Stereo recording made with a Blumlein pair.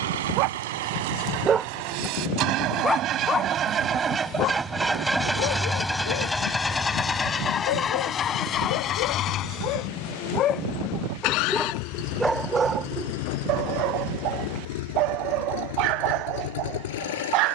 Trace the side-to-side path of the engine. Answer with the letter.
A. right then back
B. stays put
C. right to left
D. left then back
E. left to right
C.